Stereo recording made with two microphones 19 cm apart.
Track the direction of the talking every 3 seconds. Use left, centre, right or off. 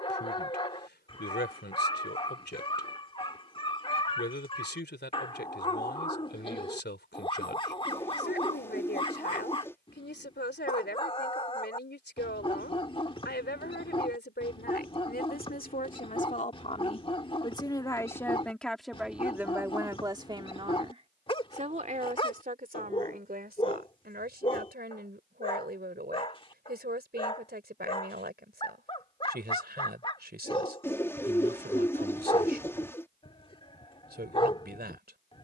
left, left, left, left, left, left, centre, right, right, right, right, right.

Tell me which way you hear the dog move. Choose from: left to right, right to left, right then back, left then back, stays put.
stays put.